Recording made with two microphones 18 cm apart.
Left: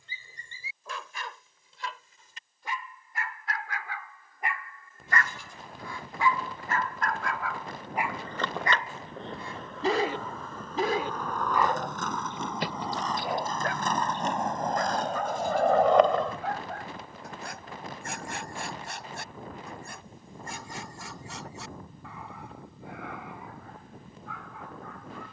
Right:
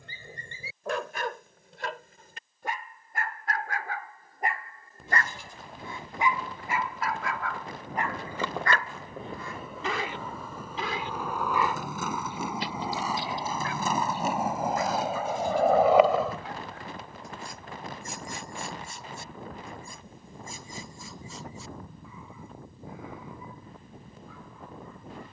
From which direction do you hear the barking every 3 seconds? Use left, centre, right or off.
right, right, centre, left, left, left, left, left, left.